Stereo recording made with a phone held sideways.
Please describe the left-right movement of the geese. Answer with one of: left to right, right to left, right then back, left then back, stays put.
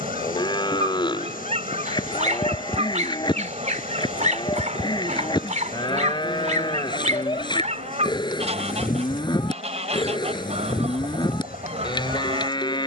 stays put.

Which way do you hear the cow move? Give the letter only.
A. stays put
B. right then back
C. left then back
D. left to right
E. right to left
A.